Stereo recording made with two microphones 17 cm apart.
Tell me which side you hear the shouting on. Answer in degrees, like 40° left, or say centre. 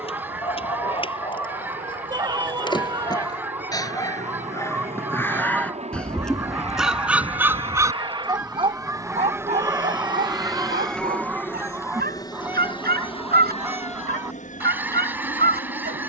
20° right.